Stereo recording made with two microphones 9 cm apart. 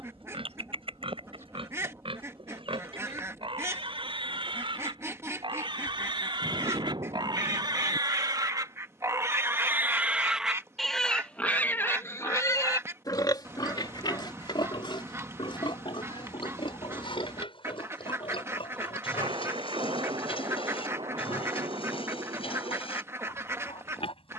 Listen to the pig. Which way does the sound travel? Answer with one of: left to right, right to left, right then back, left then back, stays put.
right to left.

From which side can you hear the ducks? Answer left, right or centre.
right.